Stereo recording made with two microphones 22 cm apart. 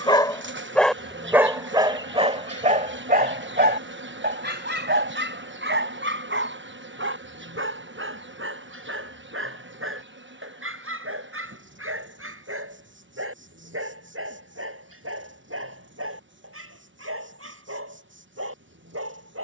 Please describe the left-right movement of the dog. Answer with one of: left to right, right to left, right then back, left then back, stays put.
left to right.